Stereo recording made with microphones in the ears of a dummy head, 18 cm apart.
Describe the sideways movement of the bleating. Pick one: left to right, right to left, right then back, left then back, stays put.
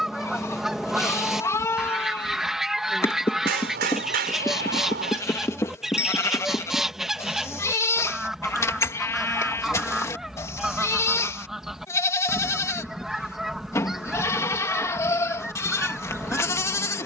stays put.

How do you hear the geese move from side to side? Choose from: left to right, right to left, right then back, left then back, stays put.
stays put.